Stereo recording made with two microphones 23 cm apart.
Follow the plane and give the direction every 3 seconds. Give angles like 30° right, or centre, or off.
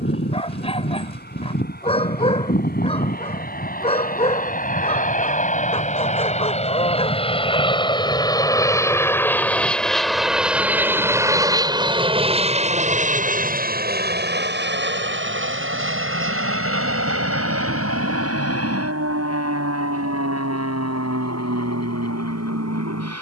50° left, 40° left, 20° left, centre, 40° right, 60° right, 70° right, 80° right.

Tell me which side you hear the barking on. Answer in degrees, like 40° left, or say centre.
30° left.